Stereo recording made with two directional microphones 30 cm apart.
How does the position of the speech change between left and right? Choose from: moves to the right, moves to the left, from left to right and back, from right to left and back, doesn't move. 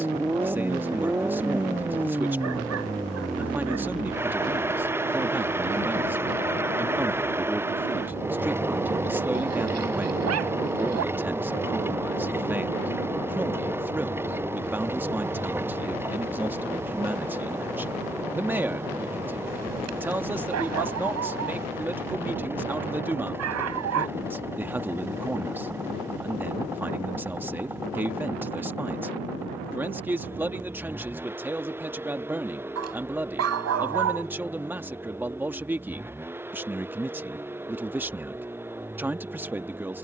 doesn't move.